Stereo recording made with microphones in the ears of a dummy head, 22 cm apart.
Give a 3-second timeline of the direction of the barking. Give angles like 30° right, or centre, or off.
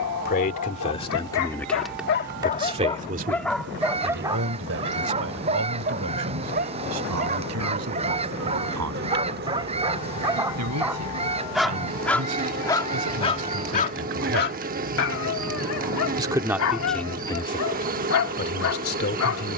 60° left, 20° right, 30° right, 10° right, 20° left, 60° left, 60° left.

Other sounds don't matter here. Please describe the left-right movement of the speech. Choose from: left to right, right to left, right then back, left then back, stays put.
right then back.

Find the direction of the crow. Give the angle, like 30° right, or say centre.
30° right.